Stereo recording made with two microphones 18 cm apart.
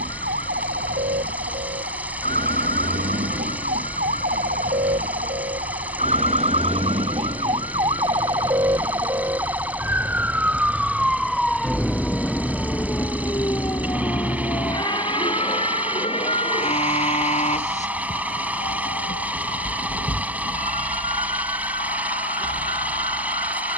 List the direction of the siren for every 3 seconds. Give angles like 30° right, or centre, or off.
60° right, 50° right, 30° right, 10° right, 20° left, 30° left, 40° left, 50° left.